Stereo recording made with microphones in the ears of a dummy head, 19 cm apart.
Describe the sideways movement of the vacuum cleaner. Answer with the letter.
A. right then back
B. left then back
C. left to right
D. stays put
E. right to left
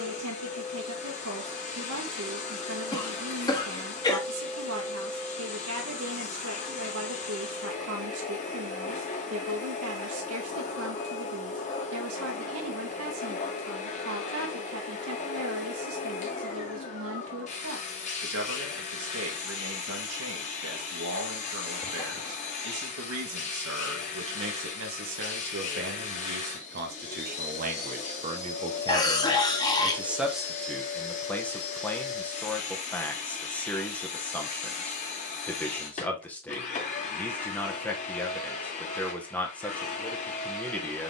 D.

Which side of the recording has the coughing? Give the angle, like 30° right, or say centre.
20° left.